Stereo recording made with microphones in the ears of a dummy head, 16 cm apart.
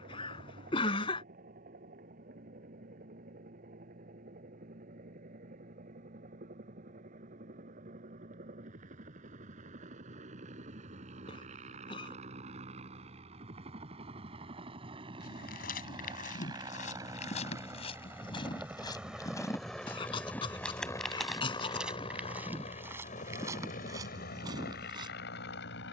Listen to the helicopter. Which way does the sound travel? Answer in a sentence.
You can hear the helicopter go from the right side to the left.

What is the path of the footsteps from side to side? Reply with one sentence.
In this clip you hear the footsteps move from left to right.